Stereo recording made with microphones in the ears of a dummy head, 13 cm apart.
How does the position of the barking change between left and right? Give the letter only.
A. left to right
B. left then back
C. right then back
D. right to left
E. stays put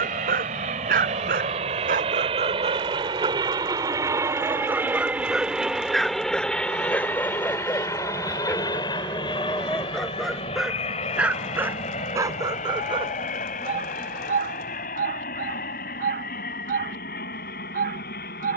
B.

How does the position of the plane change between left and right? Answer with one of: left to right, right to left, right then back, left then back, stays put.
right to left.